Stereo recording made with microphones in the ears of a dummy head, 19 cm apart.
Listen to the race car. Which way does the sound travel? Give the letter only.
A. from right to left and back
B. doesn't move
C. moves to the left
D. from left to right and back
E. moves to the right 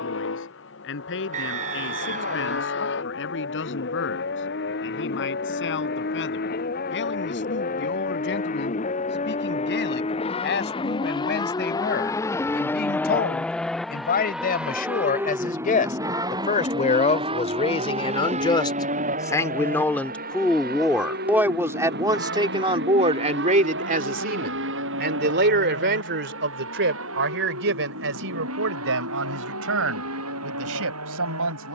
E.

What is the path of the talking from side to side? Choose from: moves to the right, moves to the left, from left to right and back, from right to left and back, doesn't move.
moves to the right.